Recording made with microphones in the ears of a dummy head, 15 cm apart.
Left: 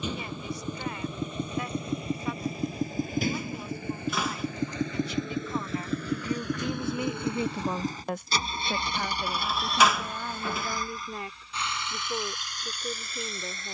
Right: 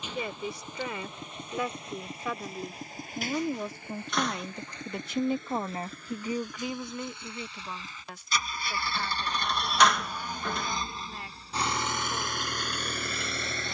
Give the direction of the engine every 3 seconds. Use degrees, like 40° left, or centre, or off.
80° left, 70° left, 40° left, 10° right, 50° right.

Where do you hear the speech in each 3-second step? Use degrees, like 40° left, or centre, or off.
70° right, 50° right, 20° left, 70° left, 80° left.